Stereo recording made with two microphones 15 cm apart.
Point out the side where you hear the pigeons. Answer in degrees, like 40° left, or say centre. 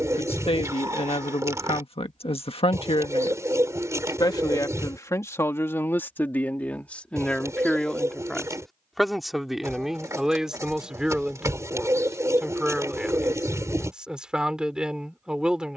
20° right.